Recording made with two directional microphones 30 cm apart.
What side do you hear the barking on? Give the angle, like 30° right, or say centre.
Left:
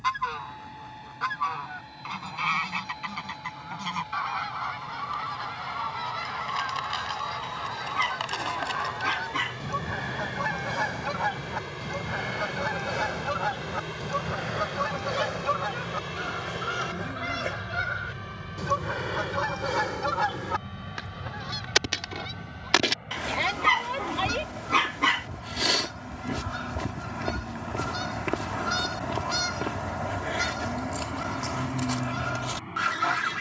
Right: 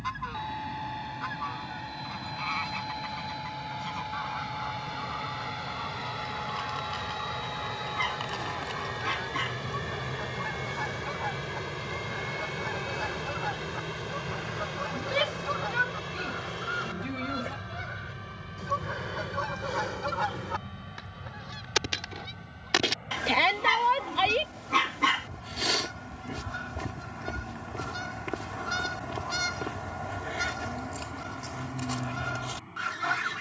30° left.